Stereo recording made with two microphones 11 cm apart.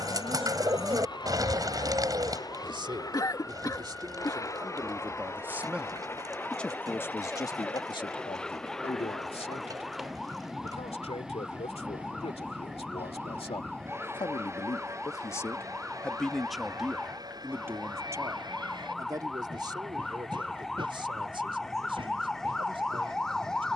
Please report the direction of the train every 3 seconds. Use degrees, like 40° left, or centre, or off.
40° left, 30° left, 10° left, centre, 20° right, 30° right, 40° right, 50° right.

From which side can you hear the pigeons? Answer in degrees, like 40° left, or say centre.
40° right.